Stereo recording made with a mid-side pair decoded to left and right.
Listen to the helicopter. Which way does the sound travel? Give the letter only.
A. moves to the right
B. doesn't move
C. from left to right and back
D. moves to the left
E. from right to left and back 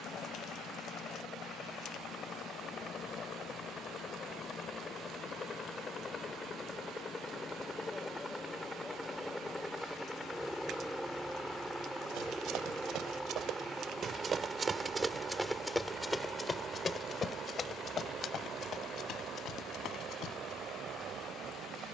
A.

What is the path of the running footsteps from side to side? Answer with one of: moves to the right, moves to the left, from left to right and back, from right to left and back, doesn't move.
moves to the left.